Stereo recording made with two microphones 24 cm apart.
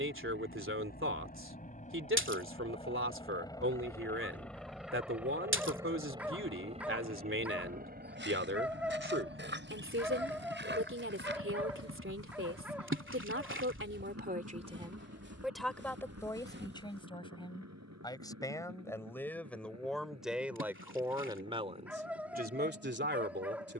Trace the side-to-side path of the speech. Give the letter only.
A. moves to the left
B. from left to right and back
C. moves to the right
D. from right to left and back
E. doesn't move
D.